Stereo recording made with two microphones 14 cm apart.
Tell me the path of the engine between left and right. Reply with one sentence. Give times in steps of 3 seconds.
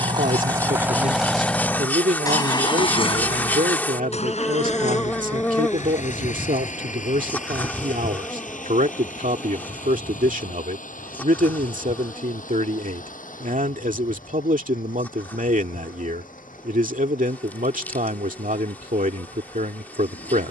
In this clip you hear the engine in the centre from 0 s and on the left from 3 s.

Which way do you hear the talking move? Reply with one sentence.
You can hear the talking stay put.